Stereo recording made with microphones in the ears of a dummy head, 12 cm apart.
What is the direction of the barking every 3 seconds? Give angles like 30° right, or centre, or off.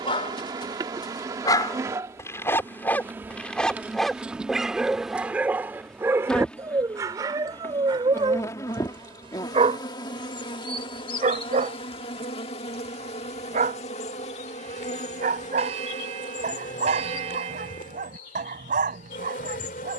30° left, centre, 30° right, 40° right, 50° right, 60° right, 60° right.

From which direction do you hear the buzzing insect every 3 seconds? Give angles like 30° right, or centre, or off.
20° right, 10° right, 20° left, 30° left, 50° left, 60° left, 60° left.